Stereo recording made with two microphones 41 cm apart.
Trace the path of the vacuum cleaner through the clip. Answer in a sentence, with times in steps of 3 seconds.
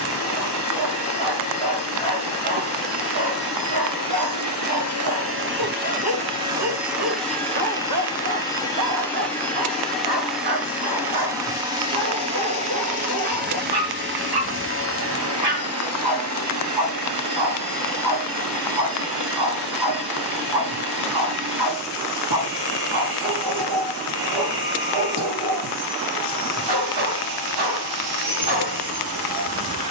You can hear the vacuum cleaner on the right from 0 s, in the centre from 6 s and on the right from 12 s.